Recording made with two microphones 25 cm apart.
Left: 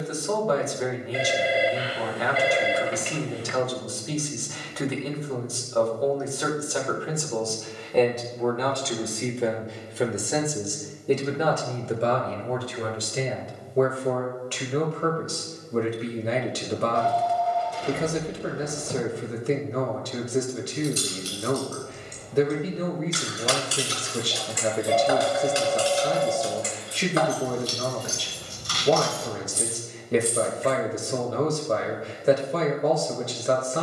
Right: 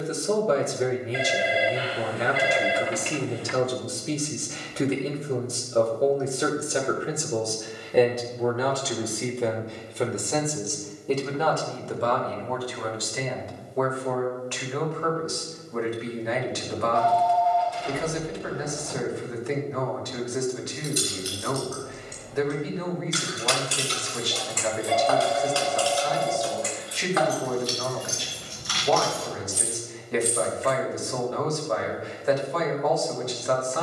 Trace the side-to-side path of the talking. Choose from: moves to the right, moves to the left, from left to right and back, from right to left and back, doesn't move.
moves to the left.